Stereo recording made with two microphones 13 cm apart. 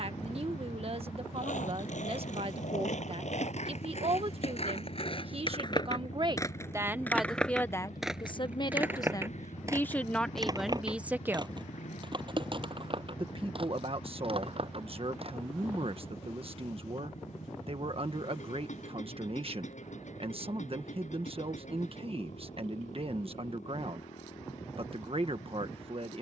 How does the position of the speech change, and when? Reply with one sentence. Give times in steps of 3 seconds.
You can hear the speech on the right from 0 s, in the centre from 6 s and on the right from 12 s.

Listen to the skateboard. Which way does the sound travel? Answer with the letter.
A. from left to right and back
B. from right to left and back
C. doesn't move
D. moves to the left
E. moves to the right
E.